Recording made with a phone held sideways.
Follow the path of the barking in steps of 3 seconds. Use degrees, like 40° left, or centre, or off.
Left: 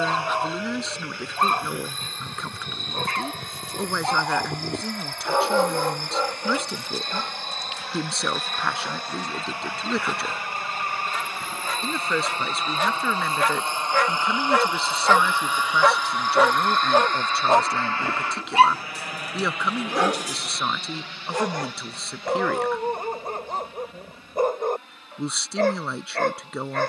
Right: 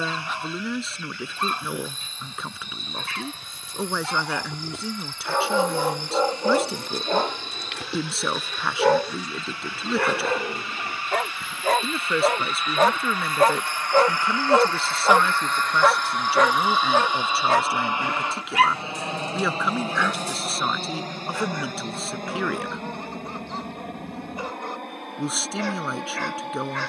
50° left, 30° left, 60° right, 70° right, 40° right, 10° left, 40° left, 50° left, 50° left.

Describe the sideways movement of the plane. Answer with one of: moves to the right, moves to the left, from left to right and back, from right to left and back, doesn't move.
moves to the right.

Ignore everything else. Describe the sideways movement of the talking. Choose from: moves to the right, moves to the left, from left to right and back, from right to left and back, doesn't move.
doesn't move.